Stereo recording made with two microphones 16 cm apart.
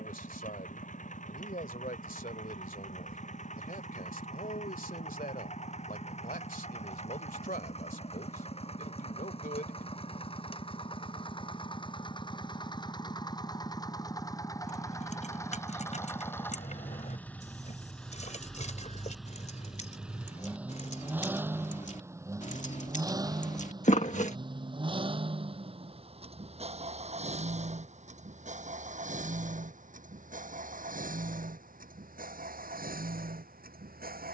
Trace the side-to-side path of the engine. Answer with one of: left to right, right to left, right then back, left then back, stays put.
left to right.